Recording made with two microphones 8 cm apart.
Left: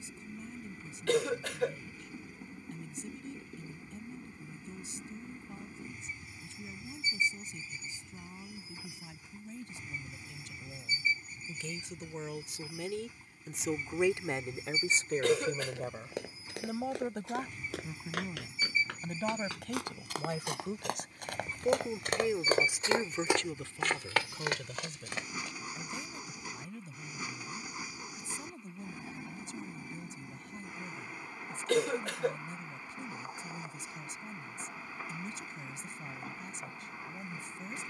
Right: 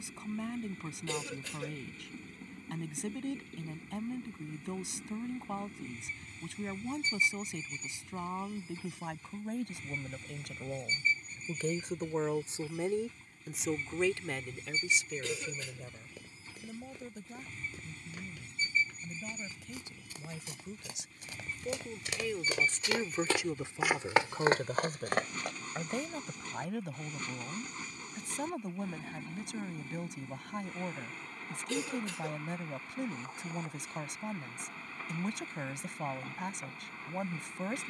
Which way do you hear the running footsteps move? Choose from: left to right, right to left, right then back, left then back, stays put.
left to right.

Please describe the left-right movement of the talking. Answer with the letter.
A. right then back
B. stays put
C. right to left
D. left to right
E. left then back
E.